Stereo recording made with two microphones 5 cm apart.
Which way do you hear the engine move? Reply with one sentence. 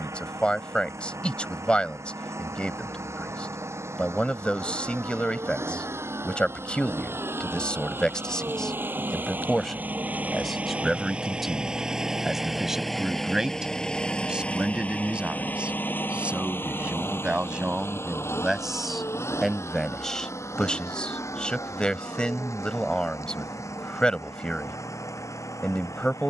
You can hear the engine go from the right side to the left.